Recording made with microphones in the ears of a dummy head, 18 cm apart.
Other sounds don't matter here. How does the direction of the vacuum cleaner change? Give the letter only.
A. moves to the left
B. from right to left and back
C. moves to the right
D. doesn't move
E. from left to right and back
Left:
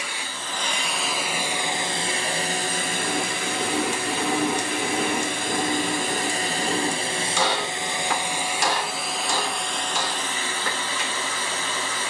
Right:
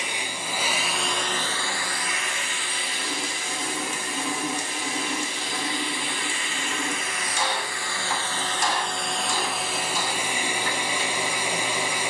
B.